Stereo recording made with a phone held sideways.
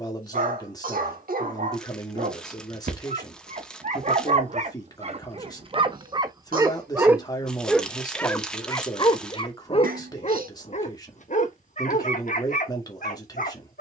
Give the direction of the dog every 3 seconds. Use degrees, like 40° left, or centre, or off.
60° right, 50° right, 10° right, 50° left, 60° left.